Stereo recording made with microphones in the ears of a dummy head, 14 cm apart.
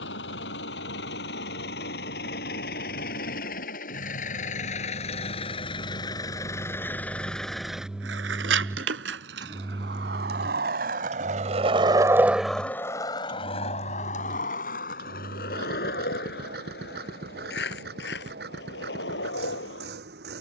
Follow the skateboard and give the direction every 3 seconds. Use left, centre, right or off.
off, off, right, right, left, left, left.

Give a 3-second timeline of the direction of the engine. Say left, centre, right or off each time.
left, left, centre, right, right, right, right.